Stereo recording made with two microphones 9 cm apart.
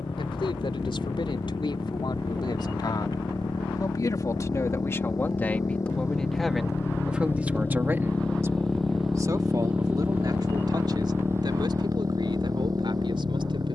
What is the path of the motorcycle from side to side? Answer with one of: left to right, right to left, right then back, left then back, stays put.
left to right.